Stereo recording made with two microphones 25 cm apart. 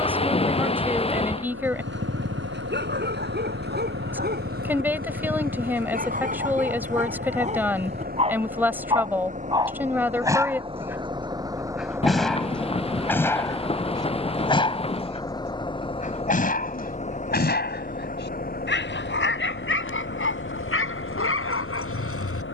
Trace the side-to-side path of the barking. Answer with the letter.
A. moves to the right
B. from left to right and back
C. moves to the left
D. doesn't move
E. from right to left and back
C.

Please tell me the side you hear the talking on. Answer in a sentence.
In this clip you hear the talking in the centre.